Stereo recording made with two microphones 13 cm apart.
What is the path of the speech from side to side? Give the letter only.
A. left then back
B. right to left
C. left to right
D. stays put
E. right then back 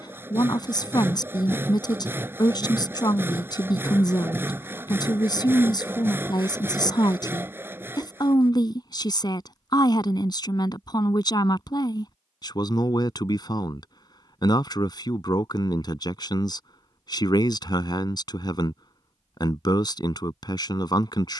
D.